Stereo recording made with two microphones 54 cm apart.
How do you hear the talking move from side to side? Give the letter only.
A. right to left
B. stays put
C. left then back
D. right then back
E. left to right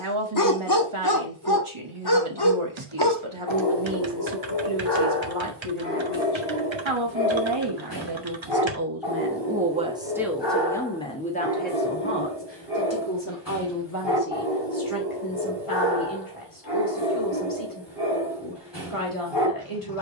A.